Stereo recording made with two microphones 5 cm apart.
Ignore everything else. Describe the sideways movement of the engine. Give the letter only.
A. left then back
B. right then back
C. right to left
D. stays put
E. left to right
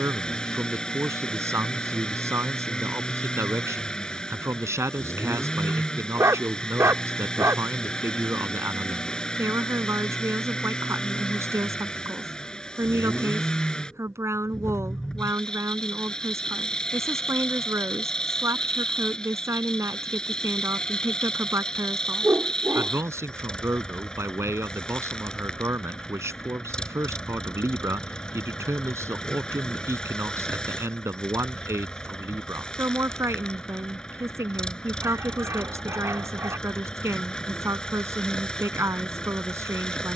D.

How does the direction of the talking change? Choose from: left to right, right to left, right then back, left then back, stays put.
stays put.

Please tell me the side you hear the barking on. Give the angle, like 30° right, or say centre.
70° right.